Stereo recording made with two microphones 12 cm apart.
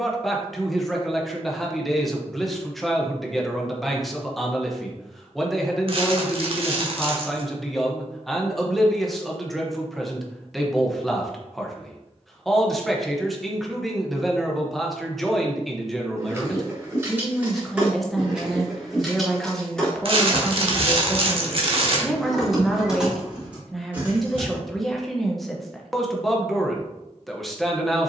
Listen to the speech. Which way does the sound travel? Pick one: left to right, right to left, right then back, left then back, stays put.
stays put.